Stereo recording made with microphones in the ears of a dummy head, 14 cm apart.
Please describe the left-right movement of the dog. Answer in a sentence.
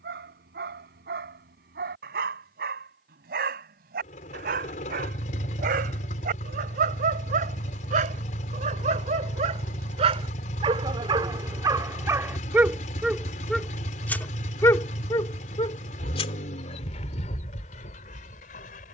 You can hear the dog go from the right side to the left.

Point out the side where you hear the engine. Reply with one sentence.
You can hear the engine on the left.